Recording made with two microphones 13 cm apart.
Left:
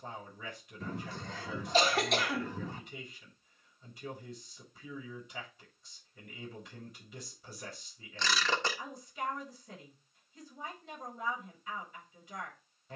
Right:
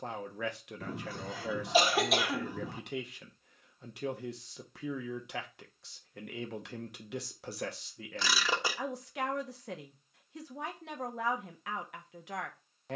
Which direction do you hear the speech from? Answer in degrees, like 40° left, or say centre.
80° right.